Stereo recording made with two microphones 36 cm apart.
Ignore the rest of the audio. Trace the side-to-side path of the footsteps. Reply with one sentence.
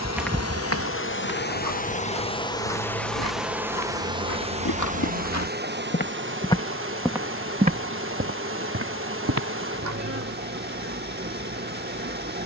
You can hear the footsteps go left and come back.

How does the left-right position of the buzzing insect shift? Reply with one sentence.
In this clip you hear the buzzing insect travel towards the right.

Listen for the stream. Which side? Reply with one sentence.
In this clip you hear the stream on the right.